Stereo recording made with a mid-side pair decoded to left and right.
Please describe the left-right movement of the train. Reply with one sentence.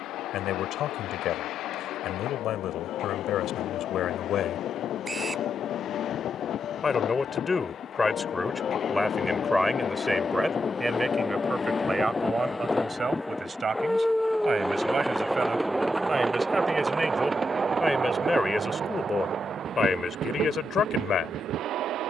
You can hear the train move to the right.